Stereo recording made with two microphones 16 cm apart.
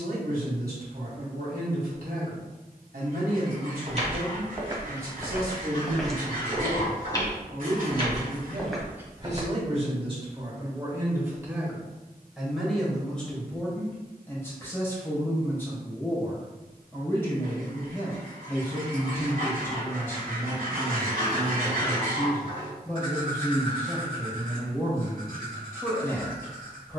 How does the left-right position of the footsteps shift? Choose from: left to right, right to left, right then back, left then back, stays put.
left then back.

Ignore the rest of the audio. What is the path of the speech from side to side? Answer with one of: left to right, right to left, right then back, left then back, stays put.
right to left.